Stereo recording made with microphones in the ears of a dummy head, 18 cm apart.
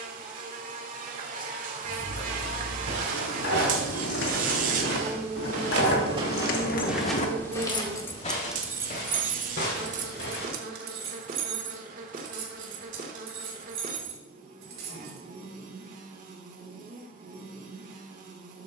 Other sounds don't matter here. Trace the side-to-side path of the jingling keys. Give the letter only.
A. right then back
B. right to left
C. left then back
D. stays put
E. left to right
E.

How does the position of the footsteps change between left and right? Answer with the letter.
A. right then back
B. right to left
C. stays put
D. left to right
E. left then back
B.